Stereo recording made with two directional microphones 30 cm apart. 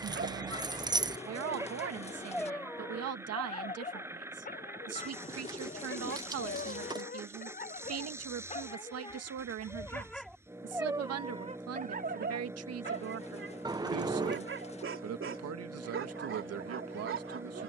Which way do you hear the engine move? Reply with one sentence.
In this clip you hear the engine stay put.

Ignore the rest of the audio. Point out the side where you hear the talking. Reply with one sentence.
In this clip you hear the talking on the right.